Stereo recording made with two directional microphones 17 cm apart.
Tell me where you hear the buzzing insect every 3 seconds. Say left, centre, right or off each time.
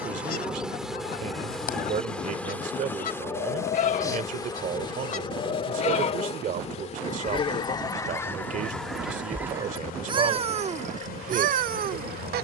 centre, left, left, left.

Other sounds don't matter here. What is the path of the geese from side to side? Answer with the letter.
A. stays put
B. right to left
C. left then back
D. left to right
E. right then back
D.